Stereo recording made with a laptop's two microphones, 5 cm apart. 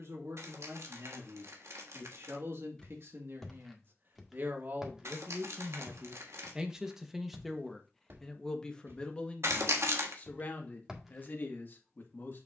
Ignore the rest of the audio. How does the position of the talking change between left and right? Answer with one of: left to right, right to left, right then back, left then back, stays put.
right to left.